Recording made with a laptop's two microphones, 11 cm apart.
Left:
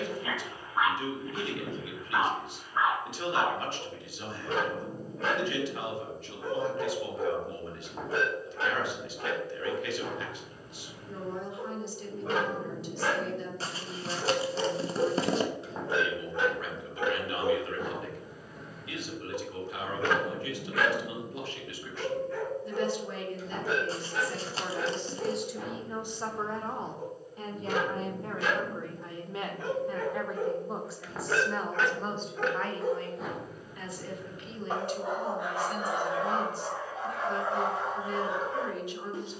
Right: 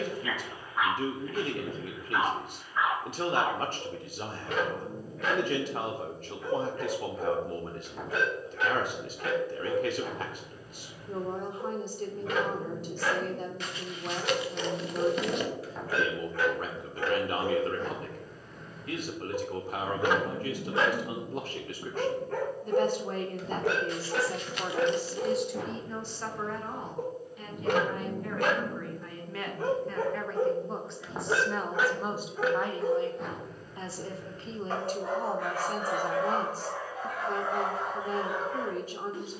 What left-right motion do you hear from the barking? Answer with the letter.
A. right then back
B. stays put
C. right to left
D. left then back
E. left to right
A.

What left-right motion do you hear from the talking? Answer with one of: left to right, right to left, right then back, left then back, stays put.
left then back.